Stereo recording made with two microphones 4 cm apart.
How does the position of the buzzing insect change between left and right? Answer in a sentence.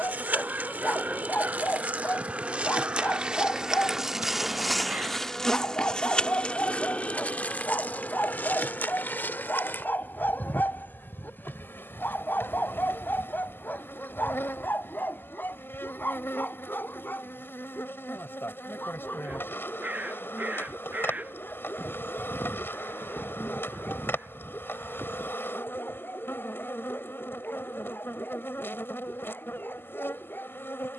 In this clip you hear the buzzing insect travel towards the left.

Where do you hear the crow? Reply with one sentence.
In this clip you hear the crow on the right.